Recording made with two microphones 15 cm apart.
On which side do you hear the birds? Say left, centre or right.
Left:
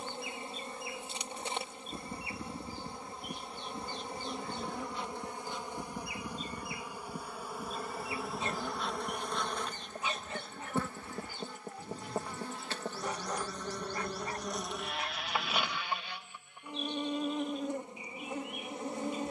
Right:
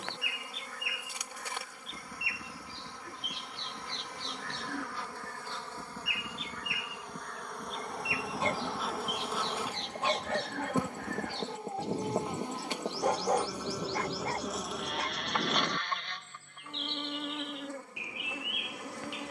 right.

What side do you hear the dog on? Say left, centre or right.
right.